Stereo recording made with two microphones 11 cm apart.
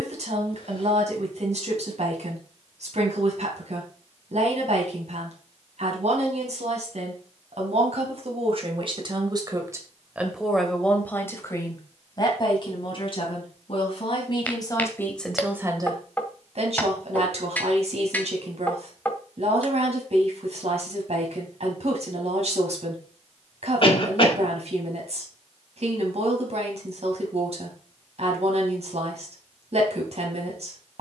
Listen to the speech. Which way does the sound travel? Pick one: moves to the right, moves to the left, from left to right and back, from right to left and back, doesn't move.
from right to left and back.